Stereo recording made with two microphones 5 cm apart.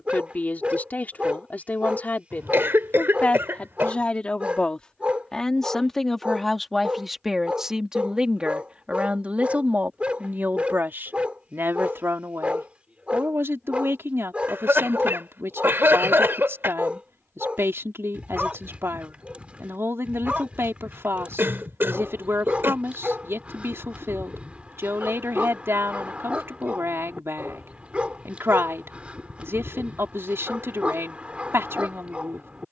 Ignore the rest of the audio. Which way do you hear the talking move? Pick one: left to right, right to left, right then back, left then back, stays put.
left to right.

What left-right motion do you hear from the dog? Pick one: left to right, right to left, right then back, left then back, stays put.
stays put.